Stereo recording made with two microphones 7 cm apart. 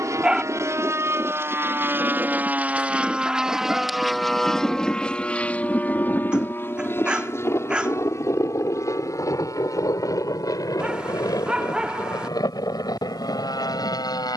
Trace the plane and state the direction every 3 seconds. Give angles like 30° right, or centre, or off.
40° right, 10° left, 40° left, 50° left, 60° left.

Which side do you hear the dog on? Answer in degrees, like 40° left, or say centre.
10° right.